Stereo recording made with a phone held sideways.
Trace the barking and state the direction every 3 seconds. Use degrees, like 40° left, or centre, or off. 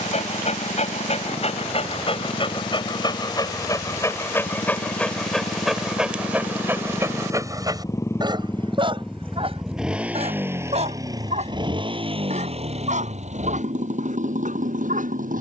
40° left, 10° left, 20° right, 40° right, 60° right.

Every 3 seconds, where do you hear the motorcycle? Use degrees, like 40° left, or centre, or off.
60° left, 50° left, 20° left, 20° right, 50° right.